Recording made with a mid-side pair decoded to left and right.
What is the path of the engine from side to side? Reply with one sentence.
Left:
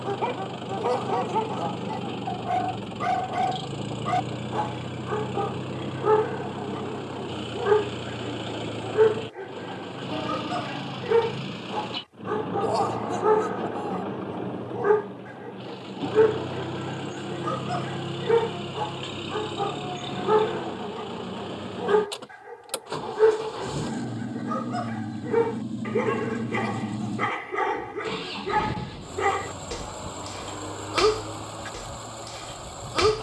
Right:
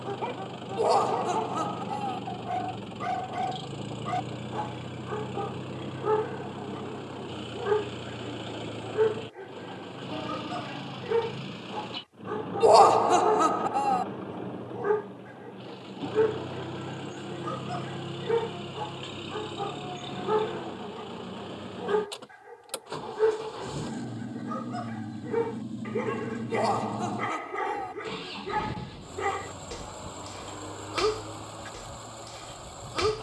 In this clip you hear the engine stay in one place.